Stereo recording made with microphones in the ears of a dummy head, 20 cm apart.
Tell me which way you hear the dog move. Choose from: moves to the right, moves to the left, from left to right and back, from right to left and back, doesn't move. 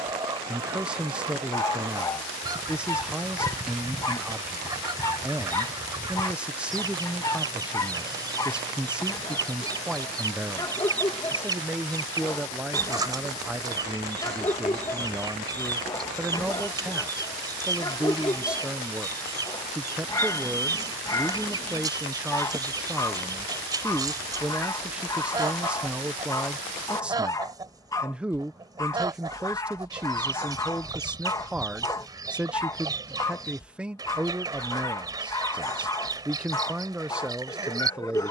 doesn't move.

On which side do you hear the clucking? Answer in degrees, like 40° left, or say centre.
20° right.